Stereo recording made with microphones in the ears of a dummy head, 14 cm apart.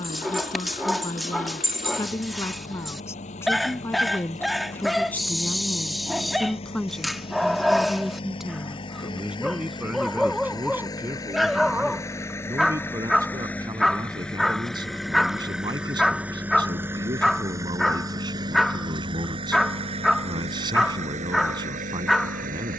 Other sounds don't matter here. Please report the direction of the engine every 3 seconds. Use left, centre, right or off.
left, left, left, left, centre, centre, right, right.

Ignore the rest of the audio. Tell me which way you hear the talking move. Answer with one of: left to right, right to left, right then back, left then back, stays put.
left to right.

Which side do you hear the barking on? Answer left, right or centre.
centre.